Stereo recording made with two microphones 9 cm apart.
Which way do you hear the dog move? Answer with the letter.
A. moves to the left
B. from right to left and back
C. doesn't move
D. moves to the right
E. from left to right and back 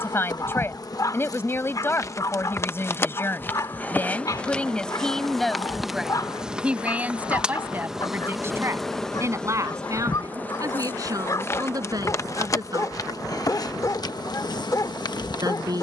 C.